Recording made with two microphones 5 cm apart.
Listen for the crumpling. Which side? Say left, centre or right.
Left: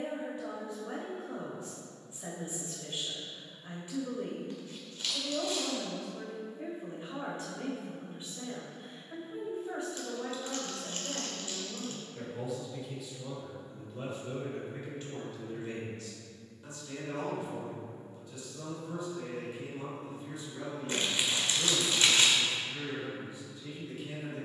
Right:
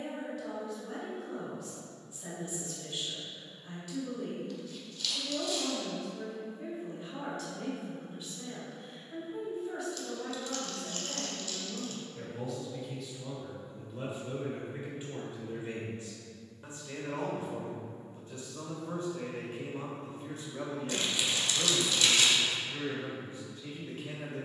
left.